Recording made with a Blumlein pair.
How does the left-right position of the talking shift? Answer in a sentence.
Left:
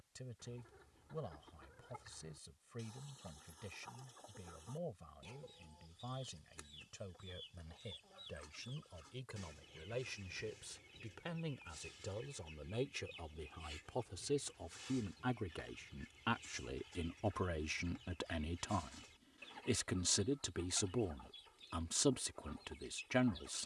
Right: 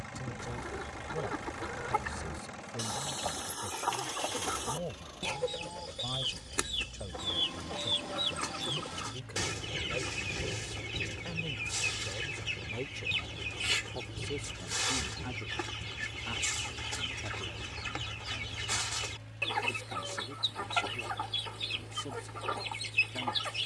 You can hear the talking move to the left.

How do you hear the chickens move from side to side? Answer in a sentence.
You can hear the chickens stay put.